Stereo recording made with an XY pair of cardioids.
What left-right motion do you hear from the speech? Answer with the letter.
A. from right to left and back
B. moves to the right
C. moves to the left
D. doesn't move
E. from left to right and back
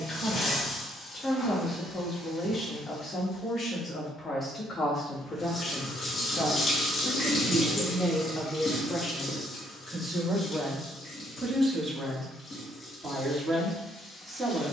B.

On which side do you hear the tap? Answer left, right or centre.
left.